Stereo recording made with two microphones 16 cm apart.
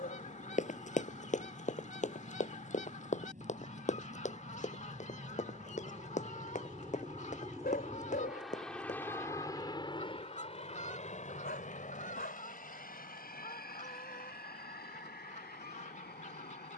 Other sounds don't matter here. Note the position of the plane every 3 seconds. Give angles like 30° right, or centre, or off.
70° right, 60° right, 20° right, 30° left, 60° left, 70° left.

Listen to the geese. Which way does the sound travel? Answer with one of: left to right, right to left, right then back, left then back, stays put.
stays put.